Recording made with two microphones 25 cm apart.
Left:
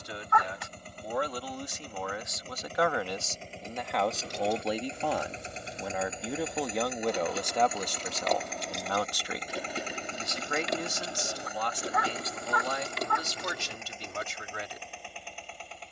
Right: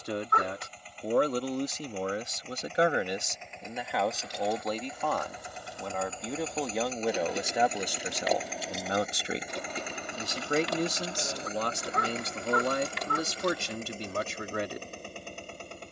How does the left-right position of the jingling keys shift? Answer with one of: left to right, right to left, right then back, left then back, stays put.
right then back.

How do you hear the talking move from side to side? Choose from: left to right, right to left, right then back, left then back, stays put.
left then back.